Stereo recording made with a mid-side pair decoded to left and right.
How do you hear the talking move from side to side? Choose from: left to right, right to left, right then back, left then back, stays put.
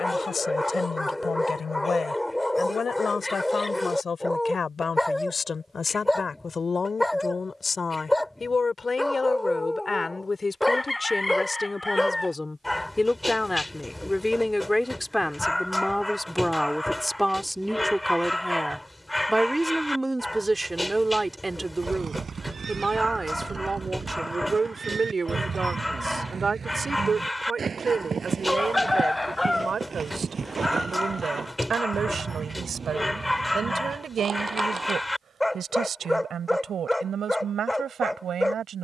left to right.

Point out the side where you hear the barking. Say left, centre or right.
centre.